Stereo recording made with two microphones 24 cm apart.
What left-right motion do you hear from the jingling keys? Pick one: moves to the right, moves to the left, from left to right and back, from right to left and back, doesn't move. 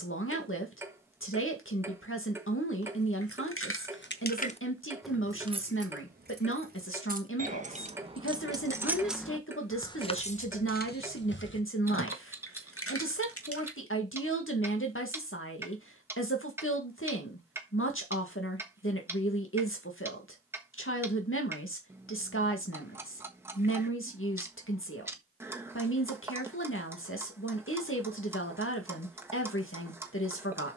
from left to right and back.